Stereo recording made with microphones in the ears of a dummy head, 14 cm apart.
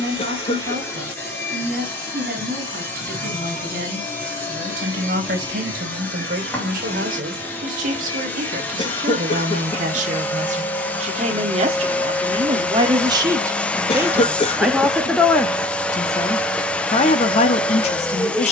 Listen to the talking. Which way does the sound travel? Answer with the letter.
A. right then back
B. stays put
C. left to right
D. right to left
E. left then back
D.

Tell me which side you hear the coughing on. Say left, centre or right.
left.